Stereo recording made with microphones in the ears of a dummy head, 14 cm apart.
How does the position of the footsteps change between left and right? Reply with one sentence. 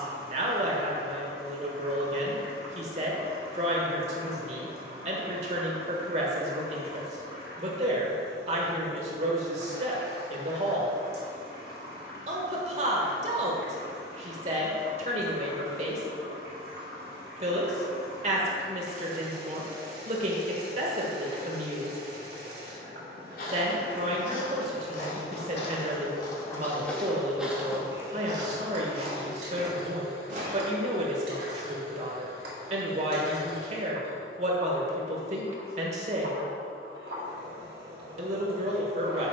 You can hear the footsteps travel towards the right.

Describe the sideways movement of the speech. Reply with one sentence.
You can hear the speech stay put.